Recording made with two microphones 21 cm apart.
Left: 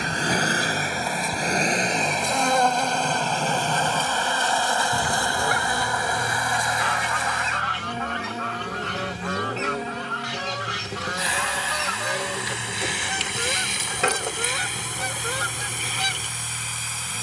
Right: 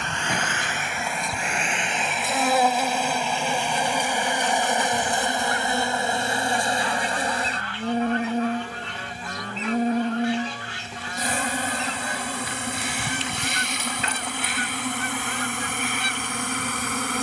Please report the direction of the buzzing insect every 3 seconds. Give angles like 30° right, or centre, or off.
centre, 10° right, 30° right, 50° right, 60° right, 60° right.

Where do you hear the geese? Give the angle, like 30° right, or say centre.
70° left.